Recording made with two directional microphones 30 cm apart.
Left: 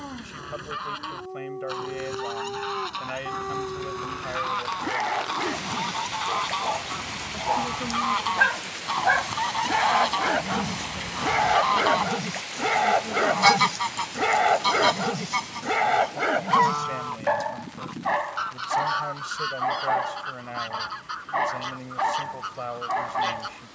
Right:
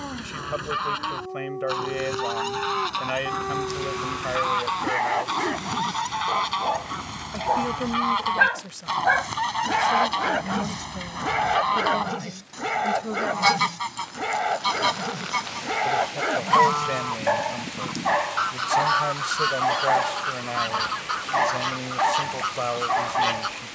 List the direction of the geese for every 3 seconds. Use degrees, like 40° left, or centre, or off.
40° right, 30° right, 20° right, 10° right, 10° left, 20° right, 40° right, 40° right.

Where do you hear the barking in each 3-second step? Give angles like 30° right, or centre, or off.
20° right, 20° right, 20° right, centre, 20° left, centre, 20° right, 20° right.